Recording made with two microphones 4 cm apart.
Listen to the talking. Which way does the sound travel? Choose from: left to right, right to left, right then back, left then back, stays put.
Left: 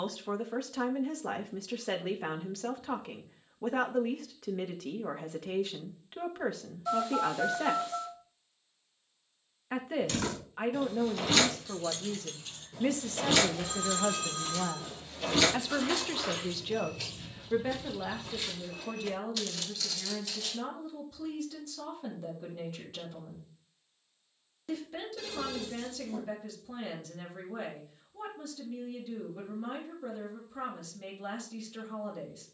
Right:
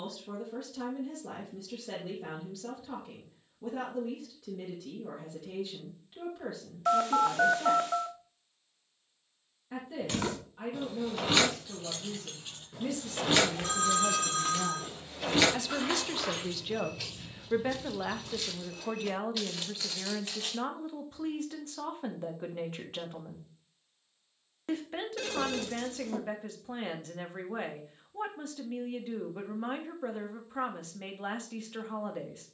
left to right.